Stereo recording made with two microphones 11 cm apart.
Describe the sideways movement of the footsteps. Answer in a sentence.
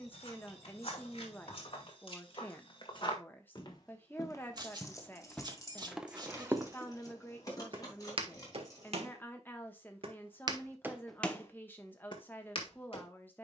You can hear the footsteps go right and come back.